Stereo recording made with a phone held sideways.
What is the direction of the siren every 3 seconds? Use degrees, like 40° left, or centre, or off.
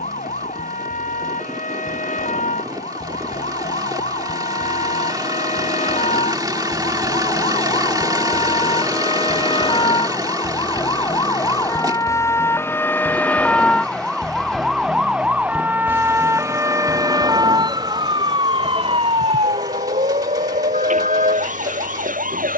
50° left, 50° left, 40° left, 30° left, 10° left, 20° right, 40° right, 50° right.